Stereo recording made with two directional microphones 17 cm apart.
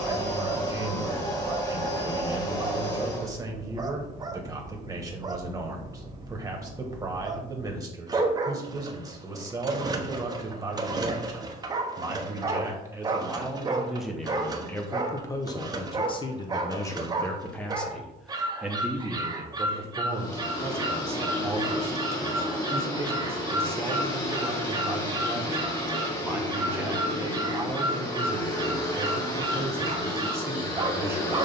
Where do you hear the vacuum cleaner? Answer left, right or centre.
left.